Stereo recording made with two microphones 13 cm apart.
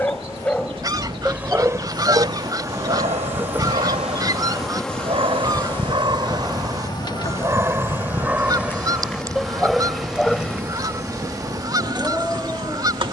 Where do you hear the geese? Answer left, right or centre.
right.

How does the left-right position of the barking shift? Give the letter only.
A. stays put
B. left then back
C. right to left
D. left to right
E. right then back
E.